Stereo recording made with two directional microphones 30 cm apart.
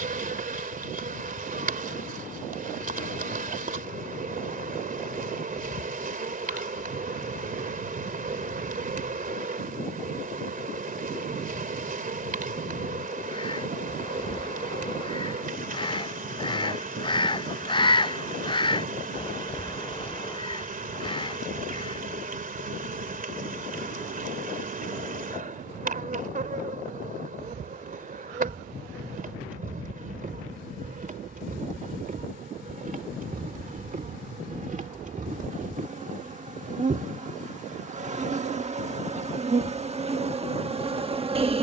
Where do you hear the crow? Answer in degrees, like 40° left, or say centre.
20° left.